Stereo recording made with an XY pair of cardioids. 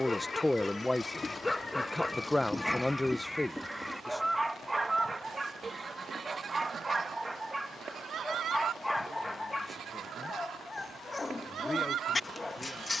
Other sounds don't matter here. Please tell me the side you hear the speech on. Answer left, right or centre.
centre.